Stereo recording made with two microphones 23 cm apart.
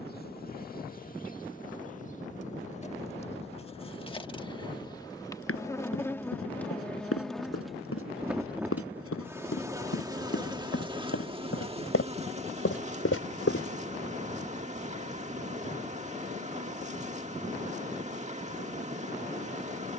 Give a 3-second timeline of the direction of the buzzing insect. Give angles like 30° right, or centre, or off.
40° left, 20° left, centre, 20° right, 30° right, 30° right, 30° right.